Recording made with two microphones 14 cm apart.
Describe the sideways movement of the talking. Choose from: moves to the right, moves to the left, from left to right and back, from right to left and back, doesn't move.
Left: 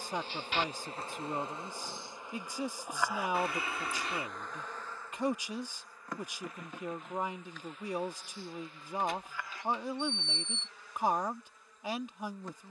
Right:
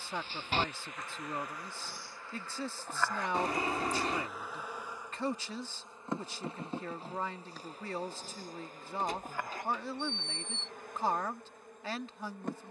doesn't move.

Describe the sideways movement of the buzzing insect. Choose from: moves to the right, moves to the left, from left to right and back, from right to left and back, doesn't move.
moves to the right.